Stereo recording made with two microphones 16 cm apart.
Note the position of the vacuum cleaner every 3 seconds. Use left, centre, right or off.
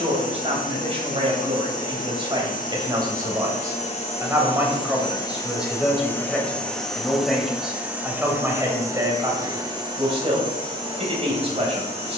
left, left, centre, right.